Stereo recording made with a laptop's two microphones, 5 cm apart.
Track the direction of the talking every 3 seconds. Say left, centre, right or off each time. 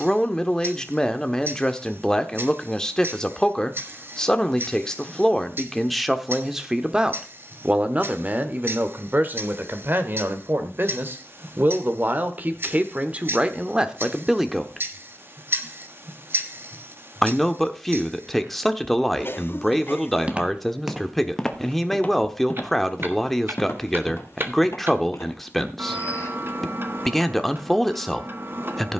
centre, centre, right, right, right, centre, centre, centre, centre, centre.